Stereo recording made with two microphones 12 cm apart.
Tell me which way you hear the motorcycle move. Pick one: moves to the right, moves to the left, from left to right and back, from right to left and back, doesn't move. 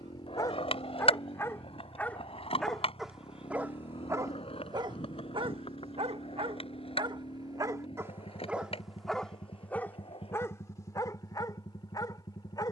doesn't move.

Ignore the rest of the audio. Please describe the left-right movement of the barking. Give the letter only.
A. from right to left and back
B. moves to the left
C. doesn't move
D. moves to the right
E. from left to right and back
E.